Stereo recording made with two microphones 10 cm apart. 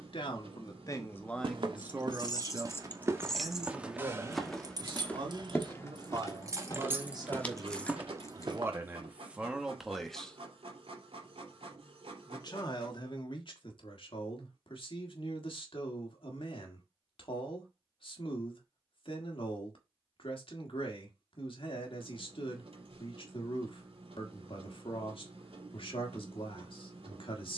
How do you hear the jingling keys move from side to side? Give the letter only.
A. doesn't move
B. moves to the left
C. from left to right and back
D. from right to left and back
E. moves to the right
C.